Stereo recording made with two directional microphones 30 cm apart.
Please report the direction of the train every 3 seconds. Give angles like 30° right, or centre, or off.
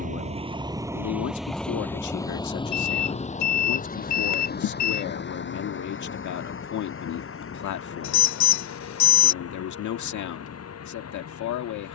centre, 30° left, 40° left, 50° left.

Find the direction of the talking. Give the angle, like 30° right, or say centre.
70° left.